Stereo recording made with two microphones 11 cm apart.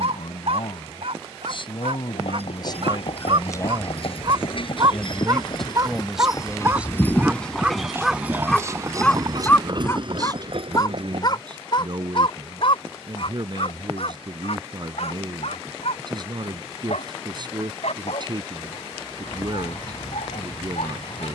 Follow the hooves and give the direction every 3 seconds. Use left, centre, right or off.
left, left, centre, right, off, off, off.